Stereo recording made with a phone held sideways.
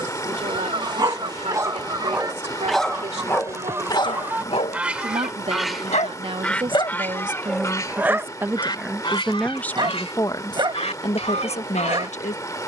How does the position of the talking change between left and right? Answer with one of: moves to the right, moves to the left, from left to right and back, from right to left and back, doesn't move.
moves to the left.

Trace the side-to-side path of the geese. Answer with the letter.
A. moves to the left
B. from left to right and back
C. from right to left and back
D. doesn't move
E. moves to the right
A.